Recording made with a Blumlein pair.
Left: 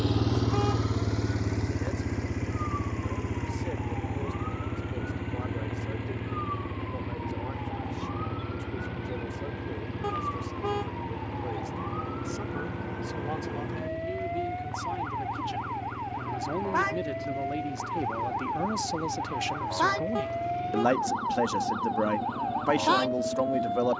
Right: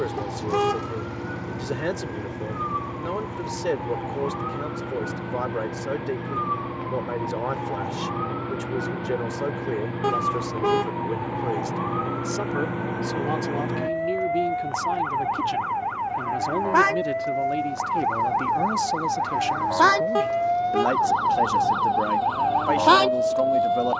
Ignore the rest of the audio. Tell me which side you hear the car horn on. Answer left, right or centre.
right.